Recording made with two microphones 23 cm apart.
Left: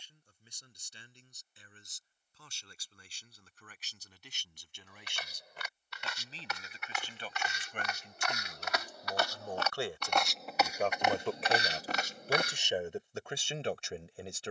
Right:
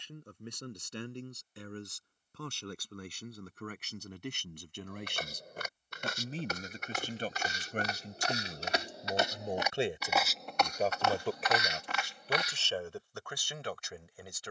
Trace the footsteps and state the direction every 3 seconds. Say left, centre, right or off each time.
off, right, right, centre, left.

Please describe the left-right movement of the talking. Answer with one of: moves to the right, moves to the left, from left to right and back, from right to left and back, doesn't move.
moves to the left.